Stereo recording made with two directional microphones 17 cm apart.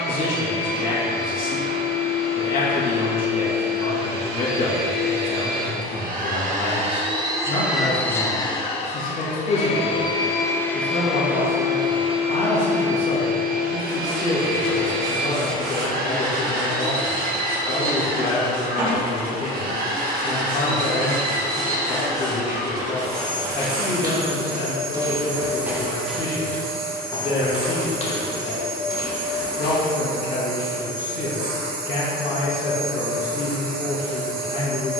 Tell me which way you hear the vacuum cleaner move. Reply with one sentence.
In this clip you hear the vacuum cleaner move from right to left and back again.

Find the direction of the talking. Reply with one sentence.
In this clip you hear the talking on the left.